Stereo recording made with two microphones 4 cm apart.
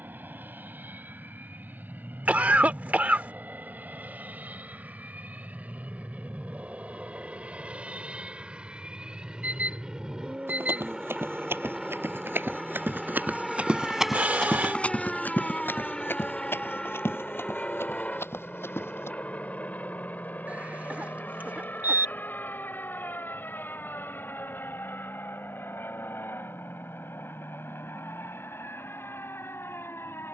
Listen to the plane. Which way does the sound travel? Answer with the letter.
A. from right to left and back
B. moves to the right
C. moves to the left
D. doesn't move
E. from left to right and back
C.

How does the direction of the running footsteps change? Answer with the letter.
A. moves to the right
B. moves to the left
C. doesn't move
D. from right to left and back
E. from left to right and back
B.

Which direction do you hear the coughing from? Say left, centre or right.
right.